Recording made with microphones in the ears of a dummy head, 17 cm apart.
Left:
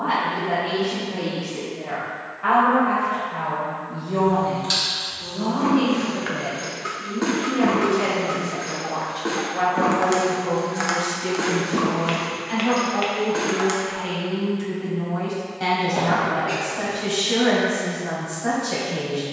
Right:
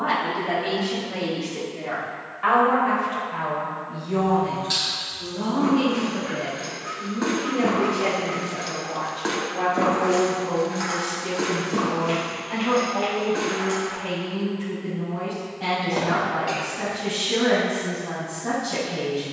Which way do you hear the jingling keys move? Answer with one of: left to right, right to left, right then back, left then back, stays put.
right then back.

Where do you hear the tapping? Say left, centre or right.
left.